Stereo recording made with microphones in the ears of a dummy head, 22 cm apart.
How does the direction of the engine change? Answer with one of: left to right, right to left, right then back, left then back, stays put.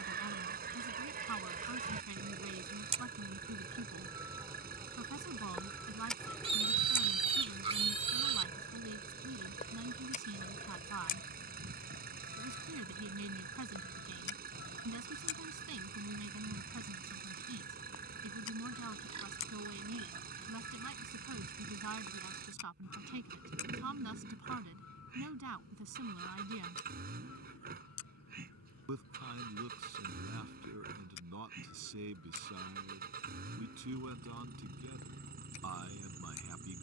stays put.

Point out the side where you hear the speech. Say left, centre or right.
right.